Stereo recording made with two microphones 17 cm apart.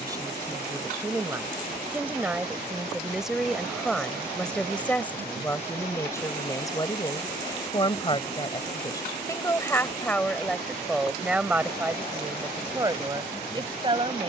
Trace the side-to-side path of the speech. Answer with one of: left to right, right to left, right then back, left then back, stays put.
left then back.